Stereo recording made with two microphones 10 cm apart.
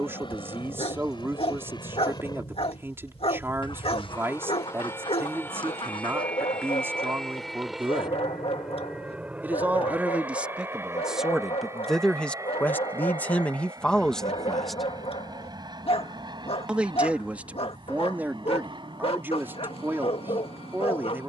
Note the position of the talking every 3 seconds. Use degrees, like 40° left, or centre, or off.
20° right, 20° right, 20° right, 10° right, 10° left, 10° right, 20° right.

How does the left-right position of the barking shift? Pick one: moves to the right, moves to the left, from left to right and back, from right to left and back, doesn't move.
doesn't move.